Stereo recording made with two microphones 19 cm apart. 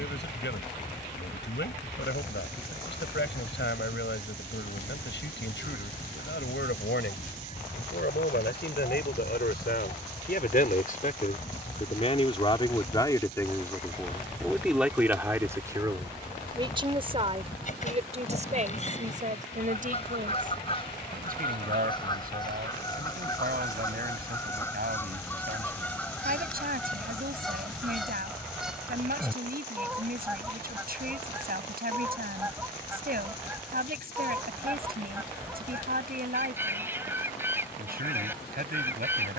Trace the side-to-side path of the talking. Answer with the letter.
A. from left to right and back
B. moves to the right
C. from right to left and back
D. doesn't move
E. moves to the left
B.